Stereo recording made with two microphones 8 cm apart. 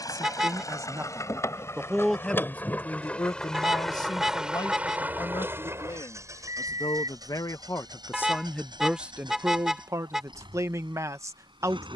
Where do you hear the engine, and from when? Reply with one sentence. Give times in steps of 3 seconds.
You can hear the engine on the left from 0 s, in the centre from 3 s and on the right from 6 s.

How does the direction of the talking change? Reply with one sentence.
You can hear the talking move from right to left and back again.